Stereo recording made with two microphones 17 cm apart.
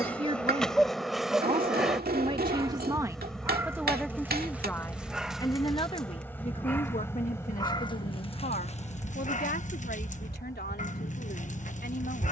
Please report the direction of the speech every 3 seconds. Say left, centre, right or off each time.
right, centre, left, left.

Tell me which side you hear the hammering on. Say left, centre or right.
right.